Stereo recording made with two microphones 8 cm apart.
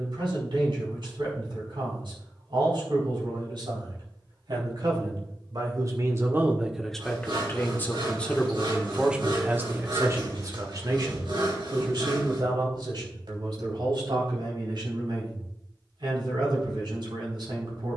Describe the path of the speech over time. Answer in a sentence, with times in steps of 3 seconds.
In this clip you hear the speech on the right from 0 s, in the centre from 6 s and on the right from 9 s.